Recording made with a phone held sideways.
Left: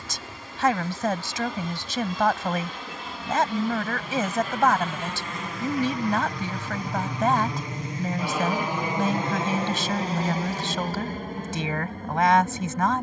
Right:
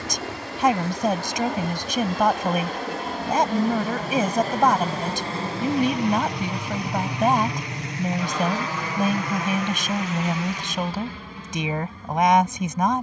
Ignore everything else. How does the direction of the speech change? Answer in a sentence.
You can hear the speech stay put.